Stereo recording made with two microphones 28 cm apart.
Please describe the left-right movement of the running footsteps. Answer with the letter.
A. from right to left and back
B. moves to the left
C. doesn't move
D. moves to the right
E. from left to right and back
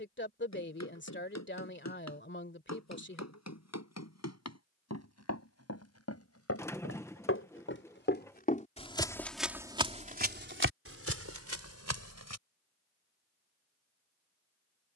D.